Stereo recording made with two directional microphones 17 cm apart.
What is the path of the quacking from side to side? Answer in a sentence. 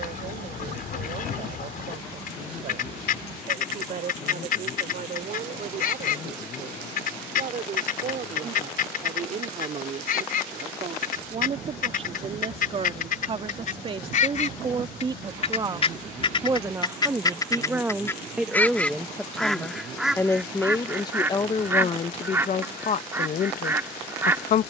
In this clip you hear the quacking go from the left side to the right.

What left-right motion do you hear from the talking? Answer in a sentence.
In this clip you hear the talking travel towards the left.